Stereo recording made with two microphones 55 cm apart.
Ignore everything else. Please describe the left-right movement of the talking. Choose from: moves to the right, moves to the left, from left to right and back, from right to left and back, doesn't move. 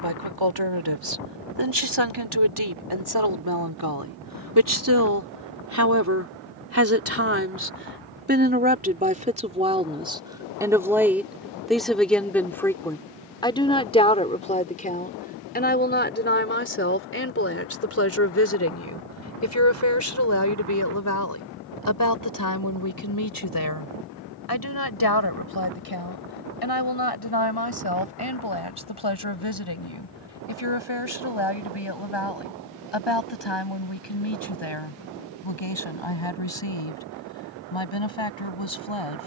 moves to the left.